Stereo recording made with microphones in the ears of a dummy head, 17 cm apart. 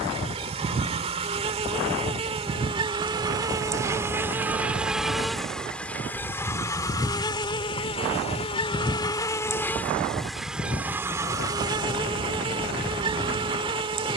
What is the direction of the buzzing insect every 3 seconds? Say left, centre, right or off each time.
right, centre, left, centre, right.